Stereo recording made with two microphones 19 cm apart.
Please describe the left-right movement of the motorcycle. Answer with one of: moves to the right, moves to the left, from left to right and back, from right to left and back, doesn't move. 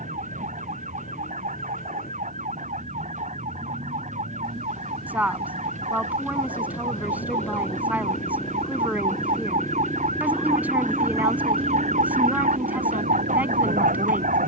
moves to the right.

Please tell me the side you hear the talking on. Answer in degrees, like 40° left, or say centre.
10° right.